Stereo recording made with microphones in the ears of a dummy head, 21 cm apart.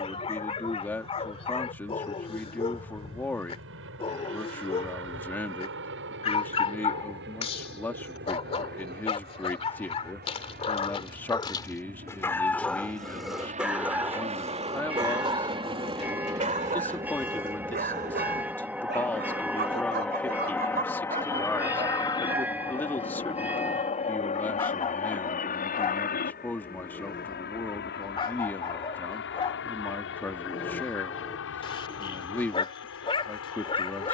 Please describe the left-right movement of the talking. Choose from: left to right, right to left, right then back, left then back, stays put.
stays put.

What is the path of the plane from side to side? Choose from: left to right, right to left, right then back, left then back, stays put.
right to left.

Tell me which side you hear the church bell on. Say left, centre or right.
centre.